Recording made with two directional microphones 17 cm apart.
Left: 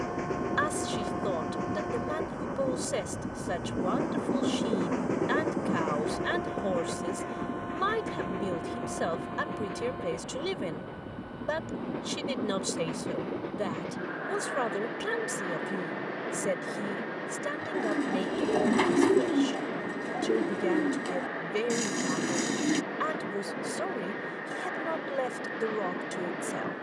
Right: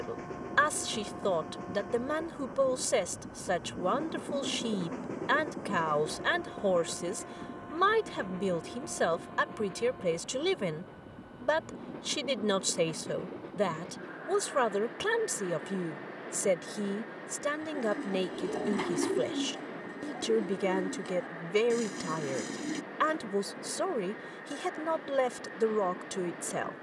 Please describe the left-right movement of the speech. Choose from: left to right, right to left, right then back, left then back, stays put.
stays put.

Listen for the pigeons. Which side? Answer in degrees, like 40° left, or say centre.
50° left.